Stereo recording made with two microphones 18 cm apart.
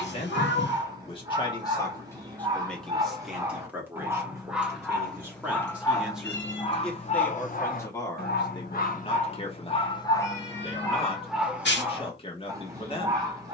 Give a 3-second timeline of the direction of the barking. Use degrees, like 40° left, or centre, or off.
20° right, centre, 40° left, 10° left, 20° right.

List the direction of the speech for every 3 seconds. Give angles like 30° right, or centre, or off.
20° left, 10° right, 10° left, 30° left, 30° left.